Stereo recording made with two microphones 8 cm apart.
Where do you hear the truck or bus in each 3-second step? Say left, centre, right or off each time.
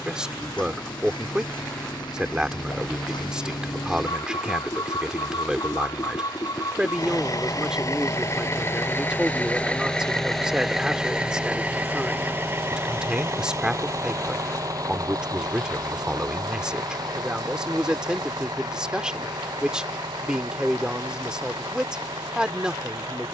left, left, left, centre, right, right, right, right.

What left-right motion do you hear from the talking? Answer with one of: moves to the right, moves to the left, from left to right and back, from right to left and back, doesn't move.
doesn't move.